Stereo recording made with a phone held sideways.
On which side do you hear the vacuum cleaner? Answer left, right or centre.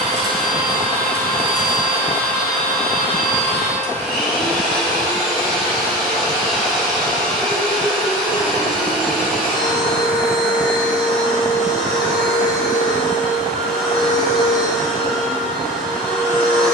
centre.